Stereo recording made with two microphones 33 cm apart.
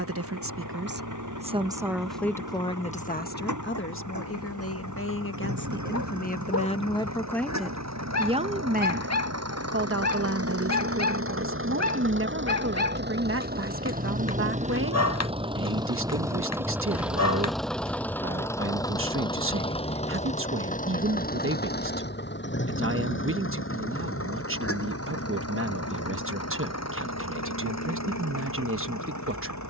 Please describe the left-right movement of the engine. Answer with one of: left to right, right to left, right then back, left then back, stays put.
right to left.